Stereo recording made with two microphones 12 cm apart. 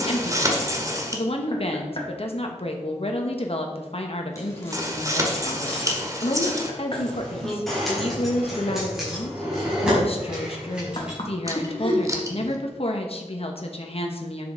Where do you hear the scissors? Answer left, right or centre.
right.